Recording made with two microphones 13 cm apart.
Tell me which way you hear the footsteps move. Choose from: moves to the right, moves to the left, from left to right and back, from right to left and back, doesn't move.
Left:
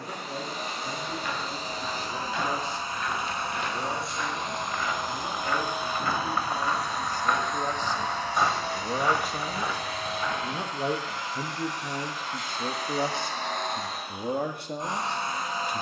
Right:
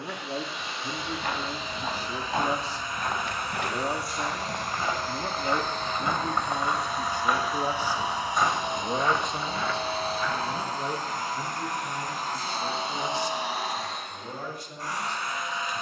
moves to the left.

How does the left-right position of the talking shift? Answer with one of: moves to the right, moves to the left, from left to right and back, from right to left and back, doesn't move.
moves to the left.